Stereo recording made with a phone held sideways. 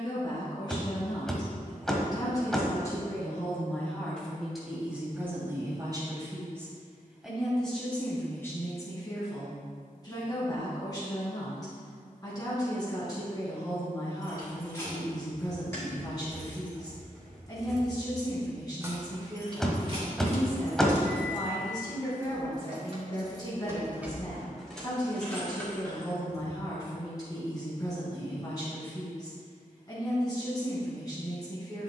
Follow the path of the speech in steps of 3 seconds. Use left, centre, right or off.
left, centre, centre, left, left, left, left, left, left, left, left.